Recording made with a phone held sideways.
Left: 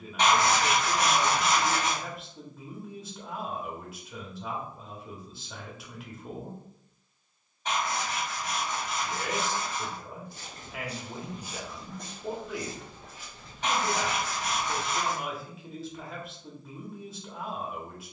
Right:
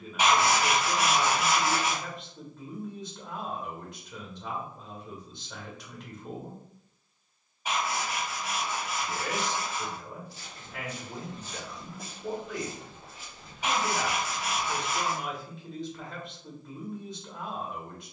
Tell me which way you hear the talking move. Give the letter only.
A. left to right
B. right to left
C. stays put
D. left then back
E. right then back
C.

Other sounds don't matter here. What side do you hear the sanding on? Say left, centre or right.
centre.